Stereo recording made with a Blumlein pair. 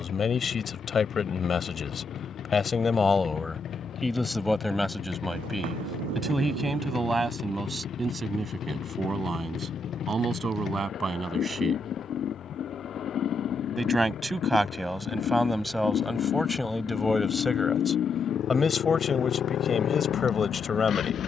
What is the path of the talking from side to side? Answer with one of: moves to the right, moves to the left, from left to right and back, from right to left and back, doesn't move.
from left to right and back.